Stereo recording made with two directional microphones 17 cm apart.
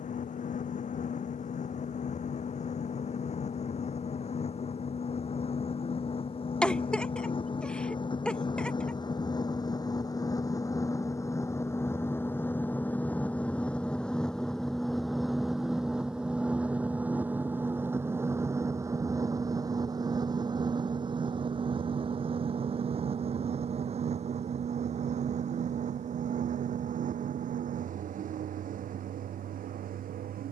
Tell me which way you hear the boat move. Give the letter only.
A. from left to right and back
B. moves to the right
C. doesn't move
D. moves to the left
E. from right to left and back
B.